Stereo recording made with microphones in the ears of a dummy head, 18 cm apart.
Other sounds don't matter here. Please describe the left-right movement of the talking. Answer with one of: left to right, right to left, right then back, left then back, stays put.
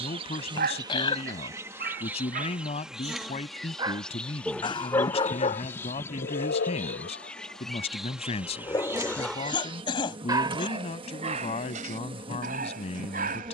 stays put.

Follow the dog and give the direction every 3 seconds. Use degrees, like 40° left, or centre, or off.
50° right, centre, 40° left, 20° right, 40° right.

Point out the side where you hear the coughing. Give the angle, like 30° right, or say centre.
30° left.